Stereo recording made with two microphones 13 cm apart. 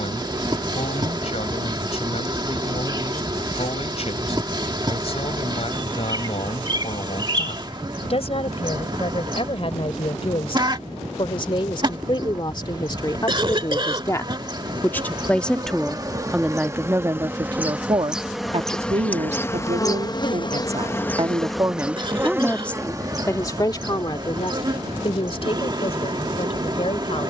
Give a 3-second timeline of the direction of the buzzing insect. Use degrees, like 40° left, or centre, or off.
30° right, 30° right, 30° right, 30° right, 30° right, 20° right, 20° left, 20° right, 30° right.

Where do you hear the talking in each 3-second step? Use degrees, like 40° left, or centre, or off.
50° left, 50° left, 50° left, 40° left, 30° left, 10° right, 50° right, centre, 40° left.